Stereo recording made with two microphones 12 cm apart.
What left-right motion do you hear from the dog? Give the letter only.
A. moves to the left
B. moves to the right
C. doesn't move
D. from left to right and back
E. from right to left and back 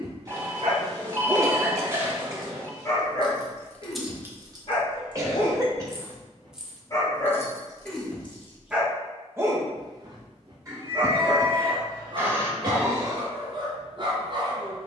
E.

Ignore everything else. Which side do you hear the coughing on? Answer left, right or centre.
right.